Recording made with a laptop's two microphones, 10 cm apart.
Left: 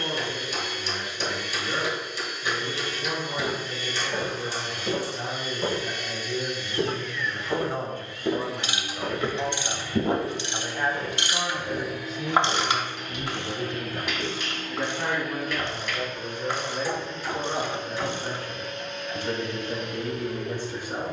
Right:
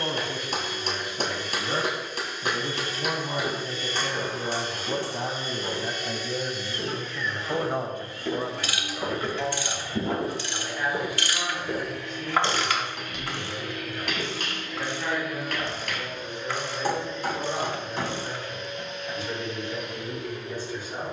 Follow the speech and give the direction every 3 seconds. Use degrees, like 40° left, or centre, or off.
70° right, 60° right, 30° right, 20° left, 40° left, 60° left, 60° left.